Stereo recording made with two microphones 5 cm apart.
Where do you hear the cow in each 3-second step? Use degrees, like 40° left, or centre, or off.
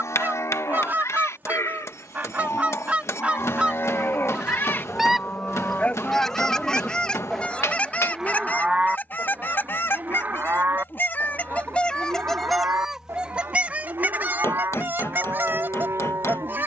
70° left, 40° left, centre, 40° right, 60° right, 60° right.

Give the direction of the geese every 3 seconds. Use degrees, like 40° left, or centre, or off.
40° right, 20° right, 20° left, 40° left, 20° right, 40° right.